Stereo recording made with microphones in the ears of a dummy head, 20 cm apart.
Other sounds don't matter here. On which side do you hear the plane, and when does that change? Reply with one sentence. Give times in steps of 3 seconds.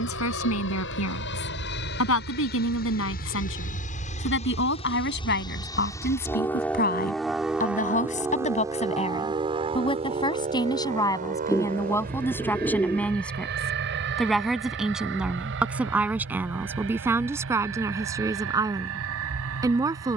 In this clip you hear the plane on the left from 0 s, in the centre from 6 s and on the right from 9 s.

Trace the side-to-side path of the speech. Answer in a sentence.
You can hear the speech travel towards the right.